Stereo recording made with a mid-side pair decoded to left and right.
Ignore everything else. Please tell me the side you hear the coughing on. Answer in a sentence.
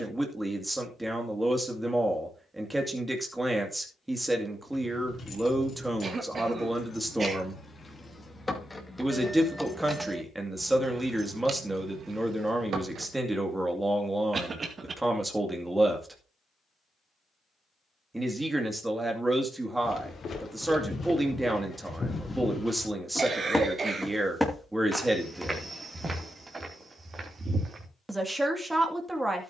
You can hear the coughing on the right.